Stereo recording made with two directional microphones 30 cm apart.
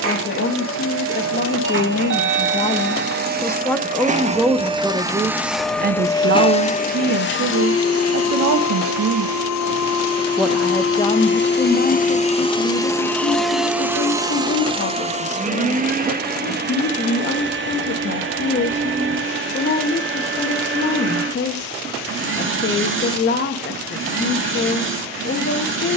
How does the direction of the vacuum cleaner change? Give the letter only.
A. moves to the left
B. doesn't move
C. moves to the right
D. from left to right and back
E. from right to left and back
E.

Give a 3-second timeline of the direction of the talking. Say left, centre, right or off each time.
left, centre, right, centre, left, left, left, left, left.